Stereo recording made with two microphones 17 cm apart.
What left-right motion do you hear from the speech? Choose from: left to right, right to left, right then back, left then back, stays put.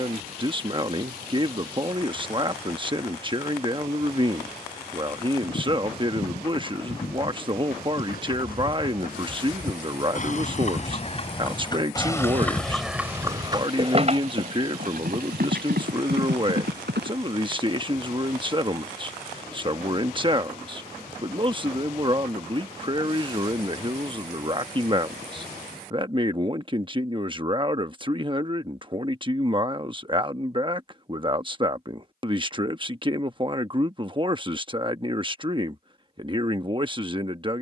stays put.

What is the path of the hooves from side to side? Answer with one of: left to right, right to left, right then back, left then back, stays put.
left to right.